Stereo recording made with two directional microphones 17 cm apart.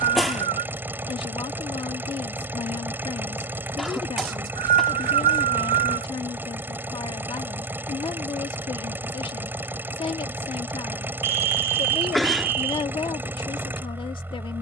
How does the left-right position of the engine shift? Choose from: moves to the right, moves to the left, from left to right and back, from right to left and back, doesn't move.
doesn't move.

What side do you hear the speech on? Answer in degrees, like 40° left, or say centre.
30° left.